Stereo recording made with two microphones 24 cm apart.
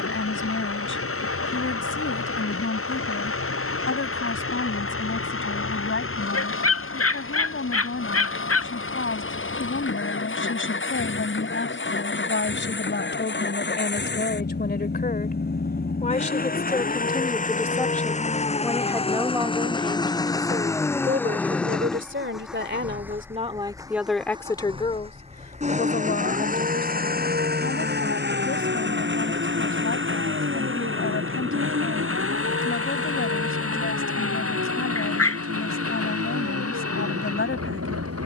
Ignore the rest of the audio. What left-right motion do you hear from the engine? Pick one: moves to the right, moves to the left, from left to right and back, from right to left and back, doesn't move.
moves to the right.